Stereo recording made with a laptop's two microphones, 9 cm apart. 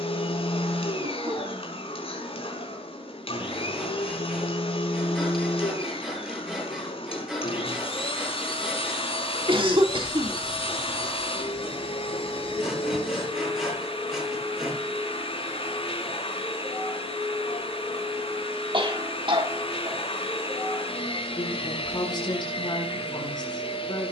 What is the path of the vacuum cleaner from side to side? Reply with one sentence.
You can hear the vacuum cleaner stay in one place.